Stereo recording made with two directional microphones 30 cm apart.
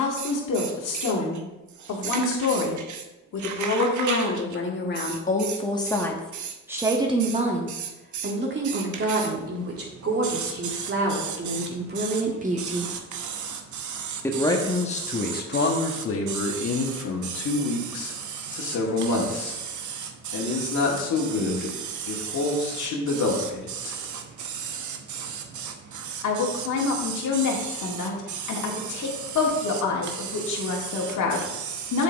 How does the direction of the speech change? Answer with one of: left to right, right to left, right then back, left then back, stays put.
right then back.